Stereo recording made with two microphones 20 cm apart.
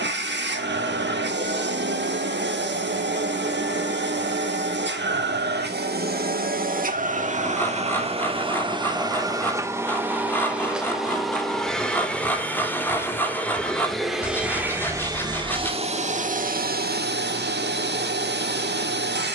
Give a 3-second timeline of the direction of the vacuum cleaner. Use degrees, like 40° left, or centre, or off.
60° right, 60° right, 40° right, 10° right, centre, 40° right, 60° right.